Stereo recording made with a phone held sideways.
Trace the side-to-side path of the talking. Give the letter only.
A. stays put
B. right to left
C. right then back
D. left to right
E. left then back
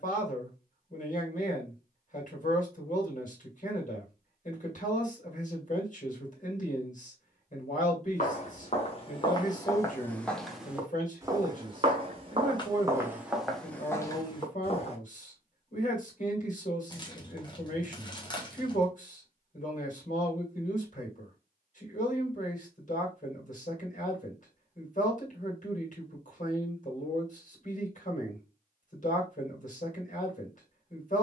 A.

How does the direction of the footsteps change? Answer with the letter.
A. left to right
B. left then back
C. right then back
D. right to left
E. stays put
C.